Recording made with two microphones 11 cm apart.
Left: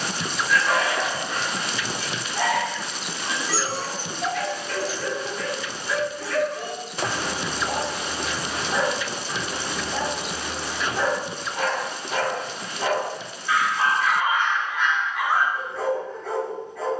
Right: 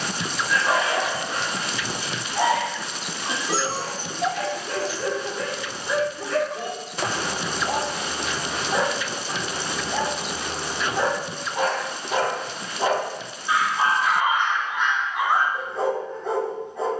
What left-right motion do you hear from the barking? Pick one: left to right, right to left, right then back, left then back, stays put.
stays put.